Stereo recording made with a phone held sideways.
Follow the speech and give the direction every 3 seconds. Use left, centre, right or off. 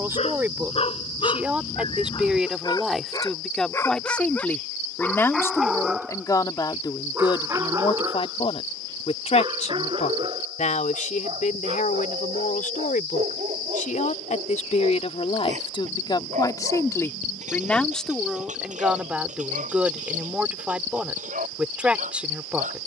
centre, centre, left, left, left, left, centre, centre.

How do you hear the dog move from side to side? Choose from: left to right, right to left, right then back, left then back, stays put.
left to right.